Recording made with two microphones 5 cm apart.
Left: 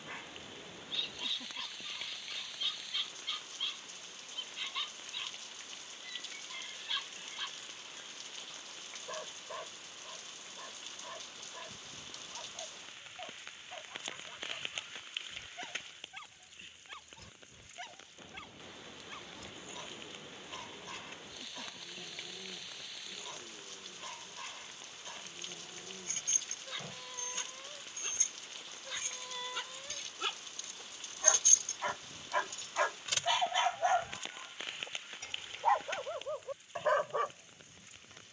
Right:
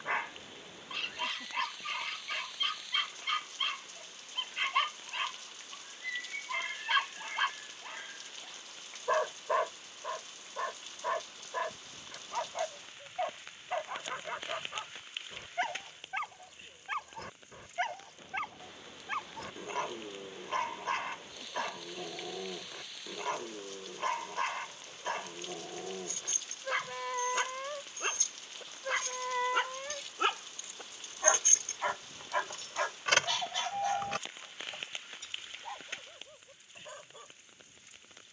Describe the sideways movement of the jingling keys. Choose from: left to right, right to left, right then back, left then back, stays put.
left to right.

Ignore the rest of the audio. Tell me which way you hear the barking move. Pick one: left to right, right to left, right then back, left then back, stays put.
right to left.